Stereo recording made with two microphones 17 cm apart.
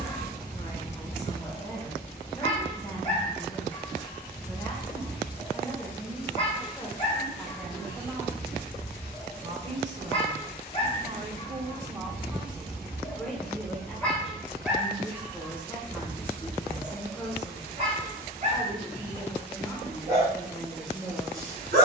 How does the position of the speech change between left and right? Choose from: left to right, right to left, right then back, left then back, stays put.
right then back.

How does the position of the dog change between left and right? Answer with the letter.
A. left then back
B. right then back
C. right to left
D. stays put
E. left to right
E.